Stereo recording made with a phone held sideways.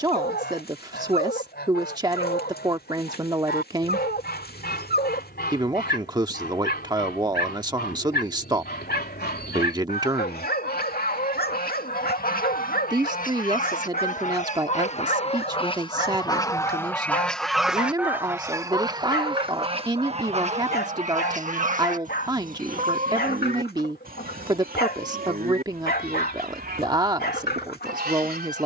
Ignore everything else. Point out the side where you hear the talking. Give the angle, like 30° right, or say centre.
20° right.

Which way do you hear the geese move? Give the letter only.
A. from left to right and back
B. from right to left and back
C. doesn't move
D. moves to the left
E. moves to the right
E.